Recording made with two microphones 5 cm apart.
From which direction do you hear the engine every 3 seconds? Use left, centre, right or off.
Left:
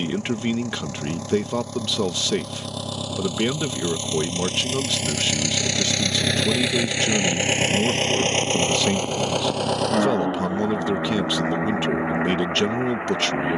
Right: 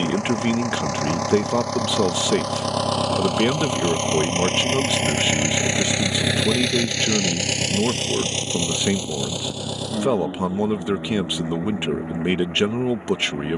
right, right, left, left, left.